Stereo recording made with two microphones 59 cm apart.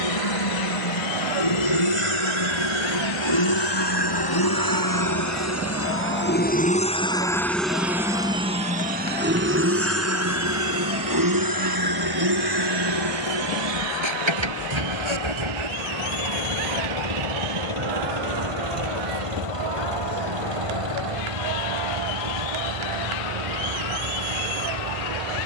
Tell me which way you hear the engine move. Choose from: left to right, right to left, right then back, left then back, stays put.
left to right.